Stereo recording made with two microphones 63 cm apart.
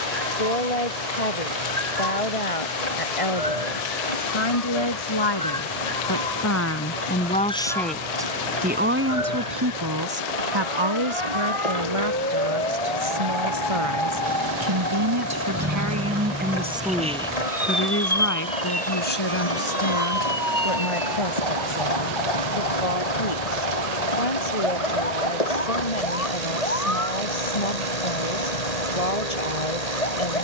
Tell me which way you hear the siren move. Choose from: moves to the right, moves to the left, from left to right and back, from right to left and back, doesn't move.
moves to the left.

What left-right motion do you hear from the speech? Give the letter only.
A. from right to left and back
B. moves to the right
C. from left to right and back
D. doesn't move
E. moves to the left
C.